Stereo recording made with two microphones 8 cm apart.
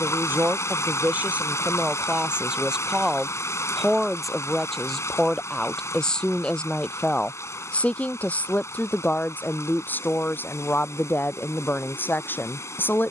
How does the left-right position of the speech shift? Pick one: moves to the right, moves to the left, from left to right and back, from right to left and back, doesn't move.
moves to the left.